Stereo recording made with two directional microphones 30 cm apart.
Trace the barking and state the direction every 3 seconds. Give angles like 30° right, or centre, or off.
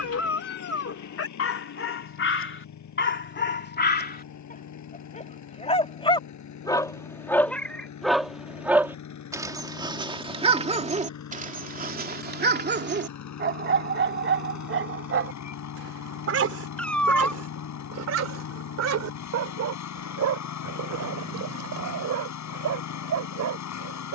40° left, 30° left, centre, 20° right, 40° right, 50° right, 60° right, 60° right.